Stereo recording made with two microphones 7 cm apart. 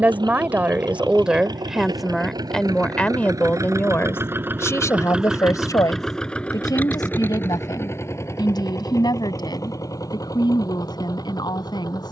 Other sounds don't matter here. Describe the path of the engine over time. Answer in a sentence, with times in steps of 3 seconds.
In this clip you hear the engine on the right from 0 s and on the left from 6 s.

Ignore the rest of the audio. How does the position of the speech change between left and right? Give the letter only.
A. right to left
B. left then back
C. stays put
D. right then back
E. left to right
A.